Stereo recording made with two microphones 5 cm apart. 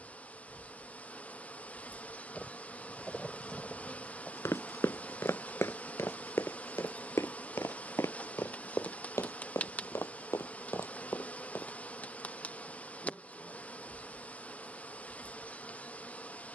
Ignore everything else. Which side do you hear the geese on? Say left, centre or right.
centre.